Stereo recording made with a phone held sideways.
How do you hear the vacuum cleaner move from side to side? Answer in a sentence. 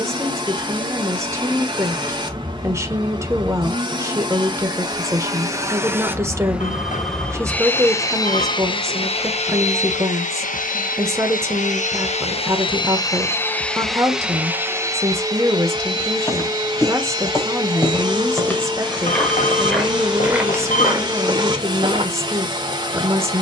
In this clip you hear the vacuum cleaner go left and come back.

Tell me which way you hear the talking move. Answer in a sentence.
In this clip you hear the talking stay in one place.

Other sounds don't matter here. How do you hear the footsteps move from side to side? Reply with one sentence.
You can hear the footsteps move from left to right.